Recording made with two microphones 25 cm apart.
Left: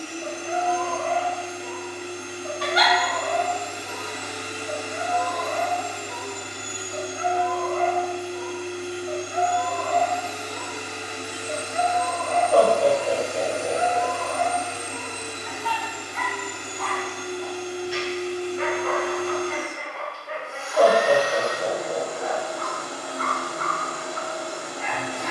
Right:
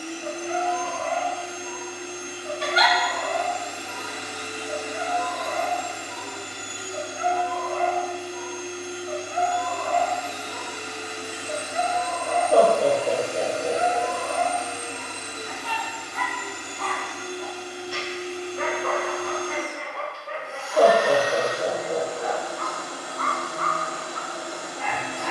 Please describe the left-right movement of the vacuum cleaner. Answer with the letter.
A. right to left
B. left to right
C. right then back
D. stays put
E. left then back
D.